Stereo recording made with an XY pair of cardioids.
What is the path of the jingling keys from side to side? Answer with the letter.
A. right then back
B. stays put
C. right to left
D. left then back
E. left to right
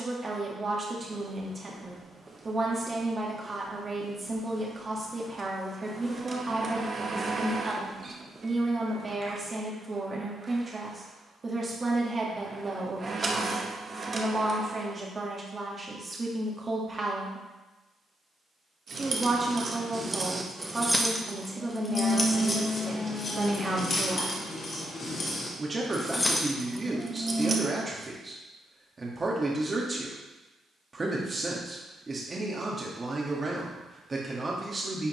D.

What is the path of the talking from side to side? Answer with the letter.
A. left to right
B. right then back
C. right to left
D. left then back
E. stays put
E.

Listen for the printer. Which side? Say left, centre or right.
right.